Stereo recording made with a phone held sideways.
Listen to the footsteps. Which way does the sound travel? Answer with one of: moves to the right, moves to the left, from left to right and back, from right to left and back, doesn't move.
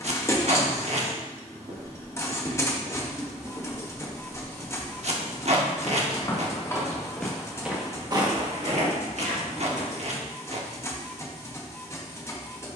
from right to left and back.